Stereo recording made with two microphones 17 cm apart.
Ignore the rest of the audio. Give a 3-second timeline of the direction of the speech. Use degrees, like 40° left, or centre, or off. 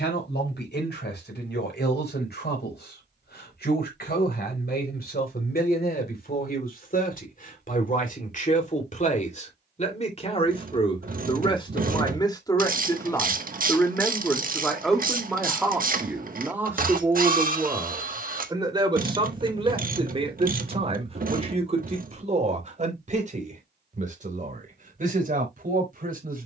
70° left, 60° left, 50° left, 30° left, 10° left, 10° right, 30° right, 40° right, 50° right.